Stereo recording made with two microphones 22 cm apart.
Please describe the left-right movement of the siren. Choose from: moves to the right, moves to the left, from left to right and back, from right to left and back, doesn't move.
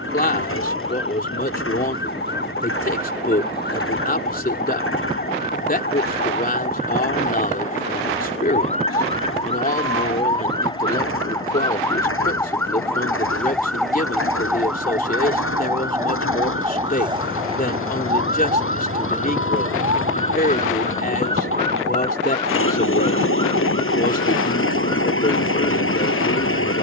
moves to the right.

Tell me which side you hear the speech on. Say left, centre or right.
left.